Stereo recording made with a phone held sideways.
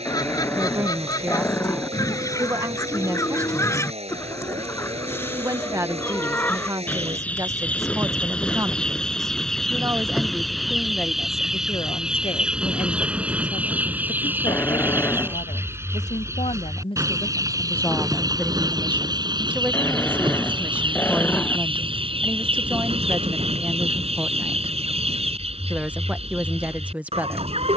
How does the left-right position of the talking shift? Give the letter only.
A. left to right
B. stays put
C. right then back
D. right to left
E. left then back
E.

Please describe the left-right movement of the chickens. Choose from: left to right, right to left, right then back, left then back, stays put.
left to right.